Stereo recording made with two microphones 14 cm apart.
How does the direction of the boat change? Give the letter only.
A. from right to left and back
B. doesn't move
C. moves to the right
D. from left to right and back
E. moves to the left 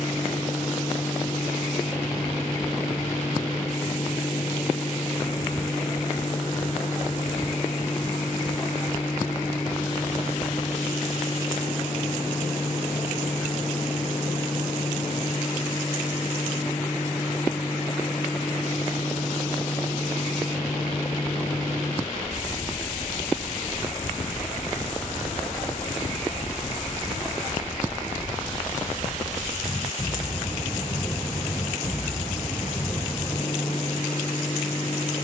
B.